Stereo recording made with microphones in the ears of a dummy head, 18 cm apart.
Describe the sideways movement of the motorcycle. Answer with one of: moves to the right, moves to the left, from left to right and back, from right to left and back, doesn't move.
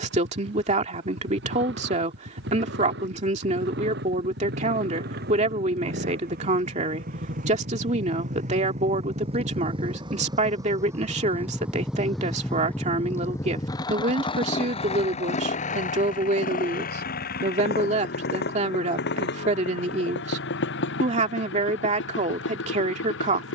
moves to the left.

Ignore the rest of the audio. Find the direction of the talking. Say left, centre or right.
right.